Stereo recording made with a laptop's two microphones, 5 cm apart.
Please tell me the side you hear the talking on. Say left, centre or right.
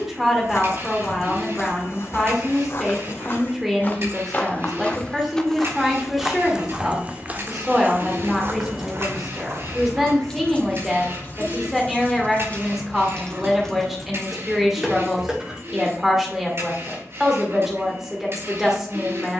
centre.